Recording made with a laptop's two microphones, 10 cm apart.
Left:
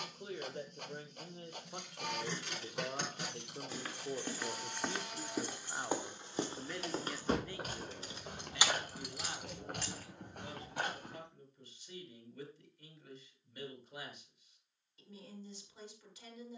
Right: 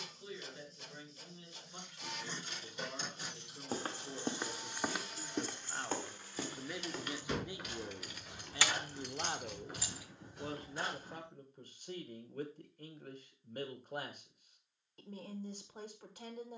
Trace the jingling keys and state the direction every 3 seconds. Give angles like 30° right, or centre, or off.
80° left, 70° left, 30° left, centre, off, off.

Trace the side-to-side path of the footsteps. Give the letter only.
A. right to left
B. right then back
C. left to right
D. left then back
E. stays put
A.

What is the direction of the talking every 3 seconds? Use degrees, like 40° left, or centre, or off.
50° left, 30° left, 10° right, 40° right, 50° right, 50° right.